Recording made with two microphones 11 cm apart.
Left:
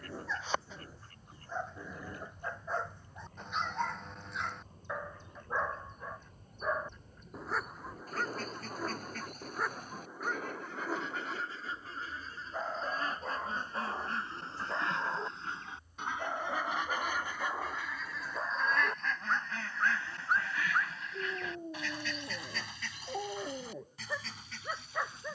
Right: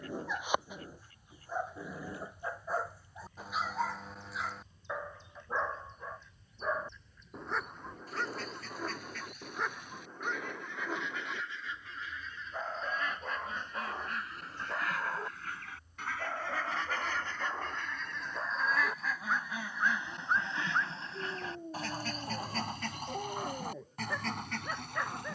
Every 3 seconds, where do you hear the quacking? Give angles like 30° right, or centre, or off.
50° left, 50° left, 50° left, 40° left, 30° left, 20° left, 10° right, 50° right, 60° right.